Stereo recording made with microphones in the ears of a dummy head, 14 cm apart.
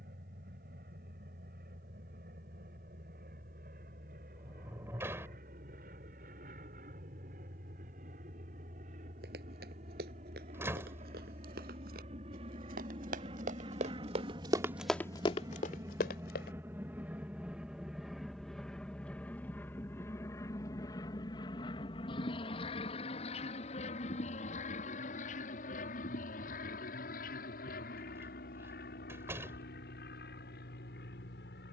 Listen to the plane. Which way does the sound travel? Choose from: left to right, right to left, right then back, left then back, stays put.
right to left.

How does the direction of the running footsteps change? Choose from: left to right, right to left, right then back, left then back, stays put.
right to left.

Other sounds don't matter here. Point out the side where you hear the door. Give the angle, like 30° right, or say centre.
20° right.